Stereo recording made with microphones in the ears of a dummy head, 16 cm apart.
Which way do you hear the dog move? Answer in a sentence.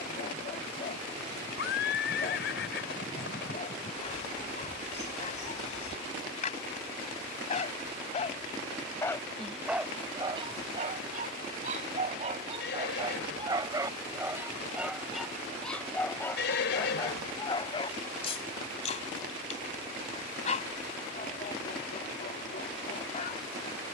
In this clip you hear the dog move from left to right and back again.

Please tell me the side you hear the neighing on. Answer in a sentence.
You can hear the neighing on the left.